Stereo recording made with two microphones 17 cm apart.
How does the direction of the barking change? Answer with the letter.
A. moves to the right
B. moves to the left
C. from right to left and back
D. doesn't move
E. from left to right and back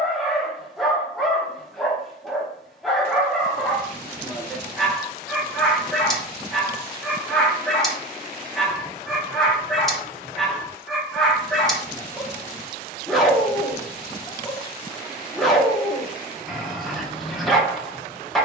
D.